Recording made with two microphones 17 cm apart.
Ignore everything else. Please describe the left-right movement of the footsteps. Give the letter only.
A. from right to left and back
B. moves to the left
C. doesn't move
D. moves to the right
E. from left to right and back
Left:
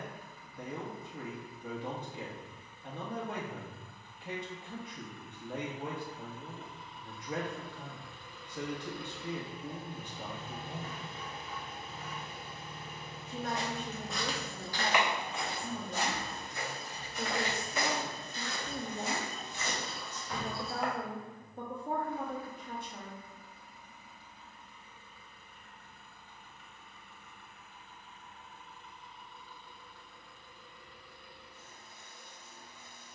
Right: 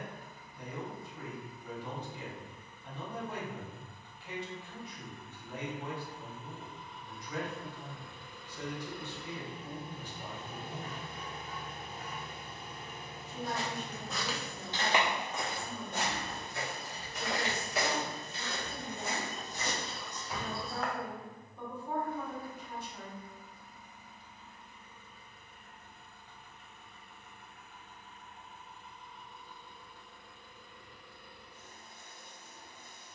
E.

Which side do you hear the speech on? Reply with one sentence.
In this clip you hear the speech on the left.